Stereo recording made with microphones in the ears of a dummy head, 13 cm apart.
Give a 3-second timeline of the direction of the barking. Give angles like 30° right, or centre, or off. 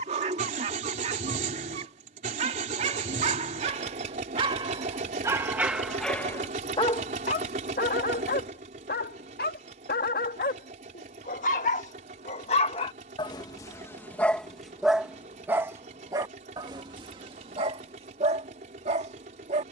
50° right, 30° right, 40° left, 60° left, 20° left, 30° right, 40° right.